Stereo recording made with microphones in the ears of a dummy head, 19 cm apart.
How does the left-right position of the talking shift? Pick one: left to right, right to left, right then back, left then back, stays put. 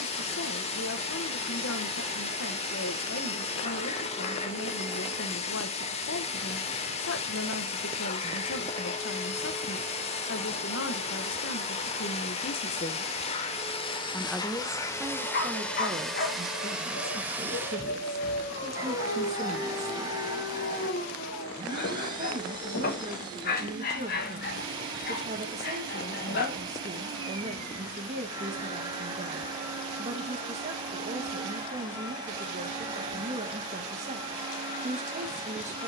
left to right.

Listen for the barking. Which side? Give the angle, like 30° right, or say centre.
50° left.